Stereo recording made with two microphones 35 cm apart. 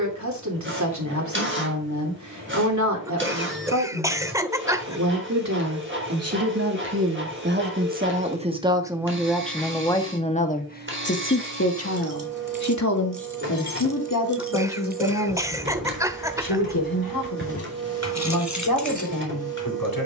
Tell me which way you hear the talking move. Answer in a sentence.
You can hear the talking go from the right side to the left.